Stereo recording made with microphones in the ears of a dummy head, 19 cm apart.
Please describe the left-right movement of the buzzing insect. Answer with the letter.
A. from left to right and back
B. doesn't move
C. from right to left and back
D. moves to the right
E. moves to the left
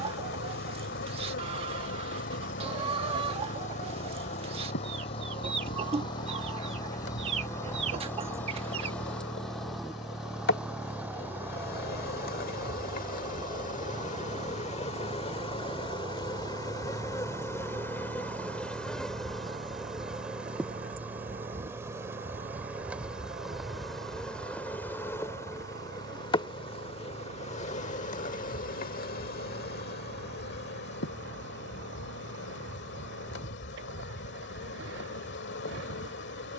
A.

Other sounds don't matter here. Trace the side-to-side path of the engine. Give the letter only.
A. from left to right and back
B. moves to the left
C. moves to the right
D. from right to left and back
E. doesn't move
C.